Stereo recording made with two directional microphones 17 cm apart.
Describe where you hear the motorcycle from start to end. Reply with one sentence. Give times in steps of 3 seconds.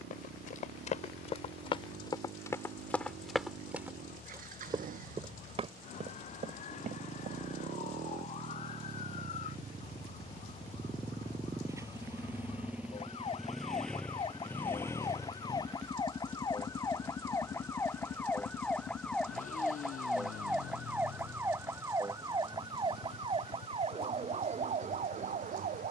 In this clip you hear the motorcycle on the right from 0 s, in the centre from 12 s and on the left from 15 s.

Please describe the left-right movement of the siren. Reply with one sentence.
You can hear the siren move from left to right.